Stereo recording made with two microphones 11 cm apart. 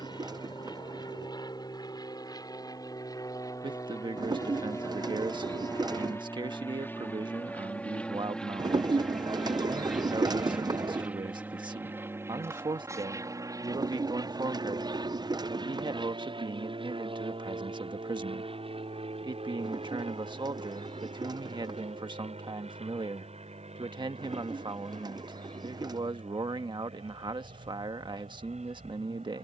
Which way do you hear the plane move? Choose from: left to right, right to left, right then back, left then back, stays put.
left to right.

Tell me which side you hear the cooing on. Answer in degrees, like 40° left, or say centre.
40° right.